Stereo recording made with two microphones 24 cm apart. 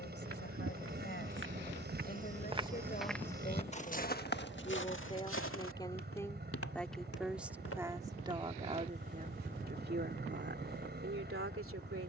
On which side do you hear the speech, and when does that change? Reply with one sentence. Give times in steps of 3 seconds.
In this clip you hear the speech on the left from 0 s, in the centre from 6 s and on the right from 9 s.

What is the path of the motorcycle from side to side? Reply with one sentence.
You can hear the motorcycle stay in one place.